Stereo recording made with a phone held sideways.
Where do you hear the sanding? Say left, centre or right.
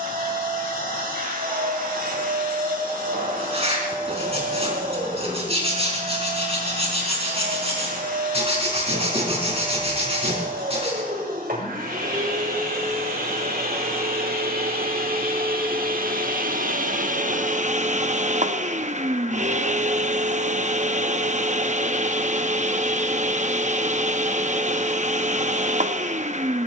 right.